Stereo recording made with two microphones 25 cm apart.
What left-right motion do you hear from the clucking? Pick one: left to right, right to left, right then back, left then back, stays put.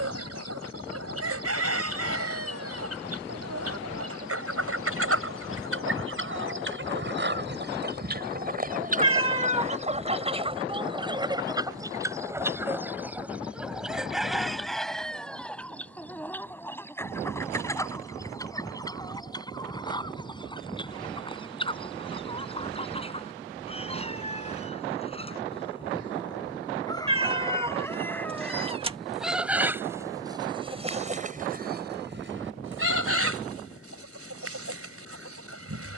left then back.